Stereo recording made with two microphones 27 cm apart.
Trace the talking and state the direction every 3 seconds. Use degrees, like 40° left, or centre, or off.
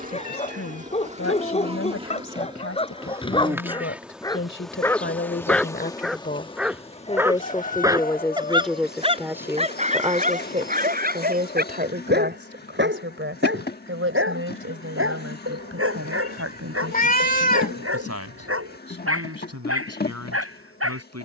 60° left, 50° left, 20° left, 20° right, 50° right, 60° right, 70° right.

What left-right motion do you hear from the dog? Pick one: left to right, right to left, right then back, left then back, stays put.
left to right.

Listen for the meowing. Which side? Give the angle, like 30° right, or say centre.
30° left.